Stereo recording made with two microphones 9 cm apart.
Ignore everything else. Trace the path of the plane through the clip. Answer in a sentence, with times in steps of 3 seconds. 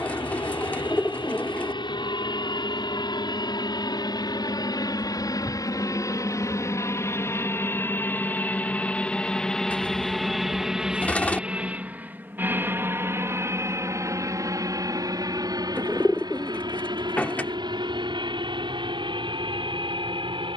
In this clip you hear the plane on the left from 0 s, in the centre from 9 s and on the right from 12 s.